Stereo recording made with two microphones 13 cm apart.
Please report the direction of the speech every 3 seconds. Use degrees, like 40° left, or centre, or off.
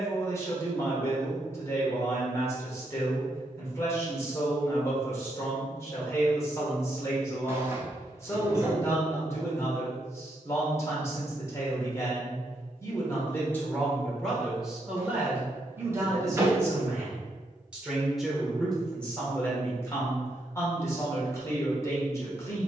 20° left, 20° left, 20° left, 20° left, 10° left, 20° right, 10° left, 20° left.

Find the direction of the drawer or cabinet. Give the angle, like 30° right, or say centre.
20° right.